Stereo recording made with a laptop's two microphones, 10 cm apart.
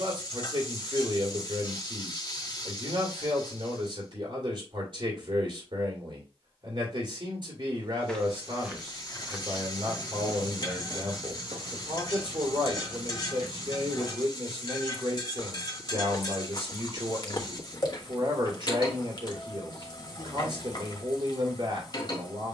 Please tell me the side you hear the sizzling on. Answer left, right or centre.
left.